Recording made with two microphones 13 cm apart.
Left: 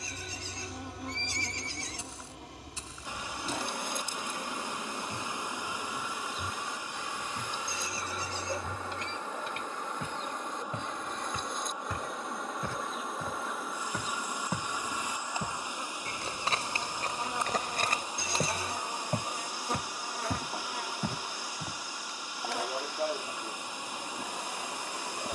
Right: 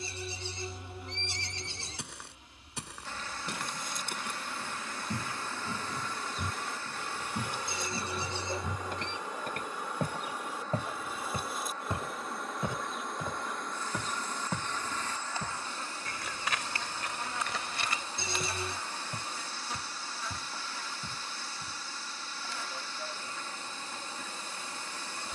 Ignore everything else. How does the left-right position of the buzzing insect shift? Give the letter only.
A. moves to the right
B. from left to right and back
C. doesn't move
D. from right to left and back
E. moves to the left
B.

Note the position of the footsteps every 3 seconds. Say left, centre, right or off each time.
right, right, right, right, centre, left, left, left, off.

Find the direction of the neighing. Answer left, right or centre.
right.